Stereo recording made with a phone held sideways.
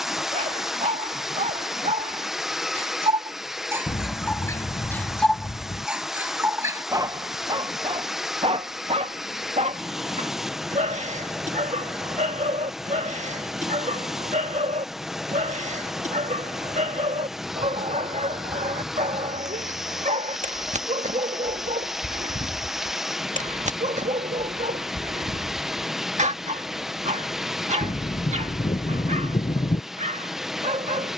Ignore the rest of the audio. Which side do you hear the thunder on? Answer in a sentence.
You can hear the thunder on the left.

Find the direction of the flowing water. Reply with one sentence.
In this clip you hear the flowing water in the centre.